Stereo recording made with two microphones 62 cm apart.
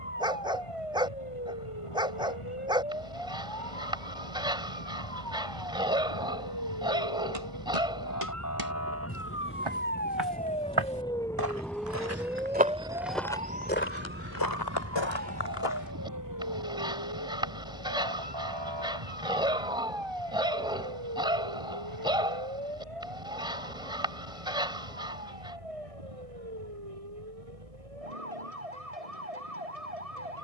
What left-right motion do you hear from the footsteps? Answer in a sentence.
In this clip you hear the footsteps move from right to left.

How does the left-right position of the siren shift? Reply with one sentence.
In this clip you hear the siren travel towards the right.